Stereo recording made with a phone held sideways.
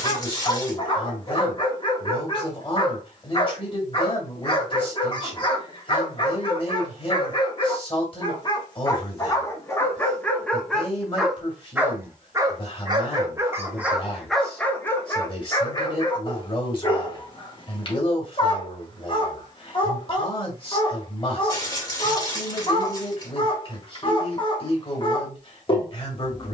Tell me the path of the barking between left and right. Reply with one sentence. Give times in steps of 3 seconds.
In this clip you hear the barking on the left from 0 s, in the centre from 9 s and on the left from 15 s.